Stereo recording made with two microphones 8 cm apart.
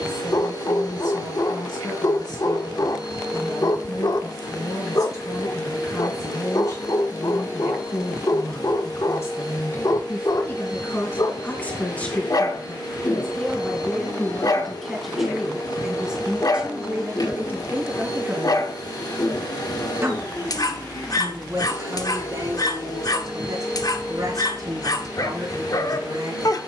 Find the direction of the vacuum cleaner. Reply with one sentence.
You can hear the vacuum cleaner on the left.